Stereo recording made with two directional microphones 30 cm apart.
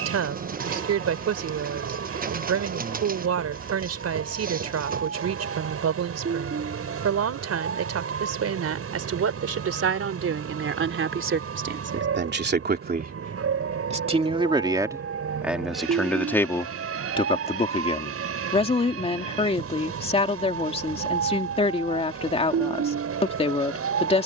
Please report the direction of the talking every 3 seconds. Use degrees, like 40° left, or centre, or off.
60° right, 60° right, 50° right, 50° right, 20° right, 10° left, 20° left, 20° left.